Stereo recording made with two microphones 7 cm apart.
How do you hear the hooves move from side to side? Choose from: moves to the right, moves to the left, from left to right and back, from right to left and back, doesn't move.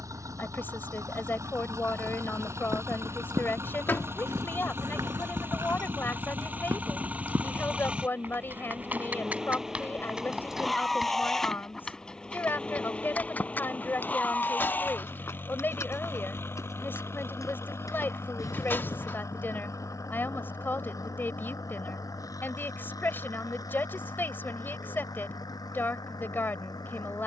moves to the left.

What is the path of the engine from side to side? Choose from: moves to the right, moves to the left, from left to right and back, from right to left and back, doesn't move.
moves to the left.